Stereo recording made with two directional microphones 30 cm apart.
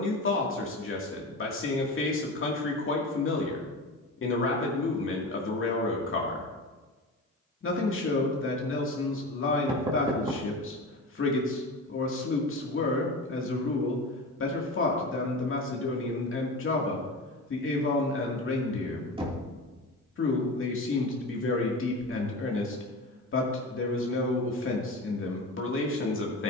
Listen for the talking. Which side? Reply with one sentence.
You can hear the talking on the left.